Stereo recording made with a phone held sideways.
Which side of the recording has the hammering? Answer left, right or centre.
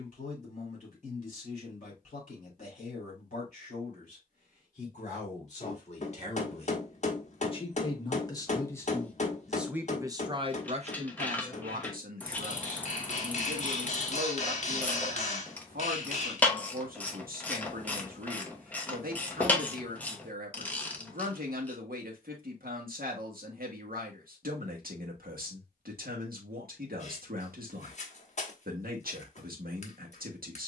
left.